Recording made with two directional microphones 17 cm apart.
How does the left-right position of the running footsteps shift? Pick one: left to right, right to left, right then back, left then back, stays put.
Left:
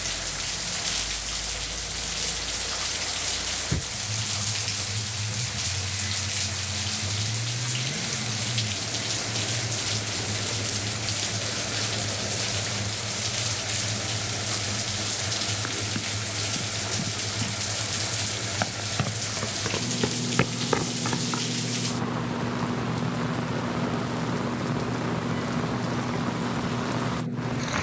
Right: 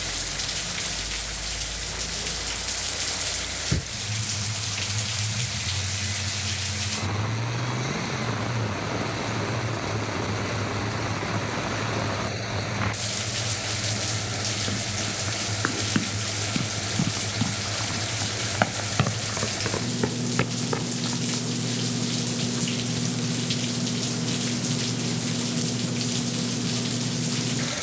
right to left.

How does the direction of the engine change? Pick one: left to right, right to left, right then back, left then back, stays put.
stays put.